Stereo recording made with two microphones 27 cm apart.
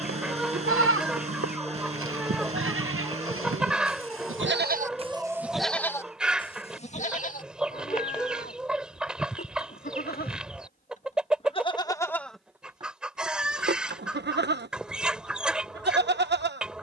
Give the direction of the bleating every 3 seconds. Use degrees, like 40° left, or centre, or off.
50° right, 30° right, 30° left, 30° left, 30° right, 40° right.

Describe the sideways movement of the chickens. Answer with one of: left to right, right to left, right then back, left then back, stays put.
stays put.